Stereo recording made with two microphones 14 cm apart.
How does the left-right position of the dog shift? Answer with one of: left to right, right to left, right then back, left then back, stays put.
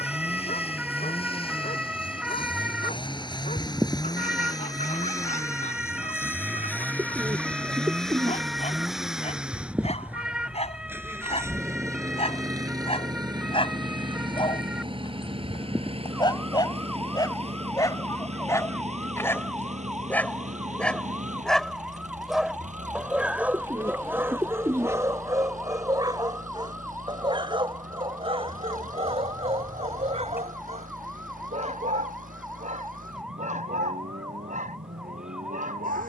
left to right.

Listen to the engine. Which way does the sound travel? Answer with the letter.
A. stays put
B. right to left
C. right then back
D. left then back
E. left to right
E.